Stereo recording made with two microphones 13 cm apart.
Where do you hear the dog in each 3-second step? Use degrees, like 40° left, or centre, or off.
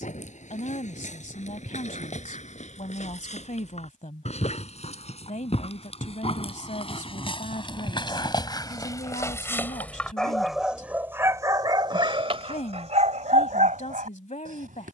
60° left, 50° left, 40° left, centre, 60° right.